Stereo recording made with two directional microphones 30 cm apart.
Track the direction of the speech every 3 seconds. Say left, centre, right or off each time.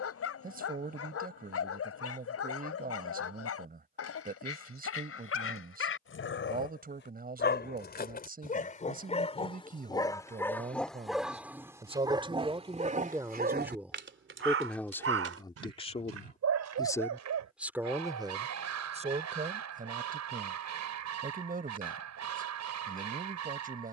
right, right, right, right, centre, centre, right, right.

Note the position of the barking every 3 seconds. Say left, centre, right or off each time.
left, left, left, centre, right, right, right, right.